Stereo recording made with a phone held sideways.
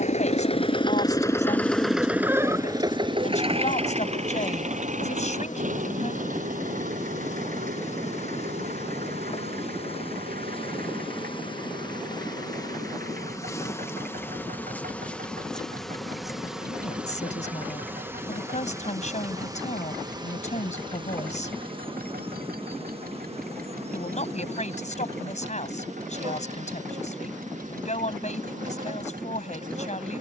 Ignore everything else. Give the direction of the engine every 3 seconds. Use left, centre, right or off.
centre, right, right, right, right, right, right, right, right, right.